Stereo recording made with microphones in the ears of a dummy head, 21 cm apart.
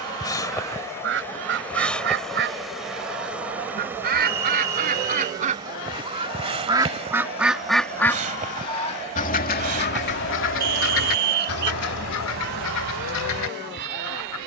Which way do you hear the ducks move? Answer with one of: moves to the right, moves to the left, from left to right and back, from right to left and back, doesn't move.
moves to the left.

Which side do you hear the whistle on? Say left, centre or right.
right.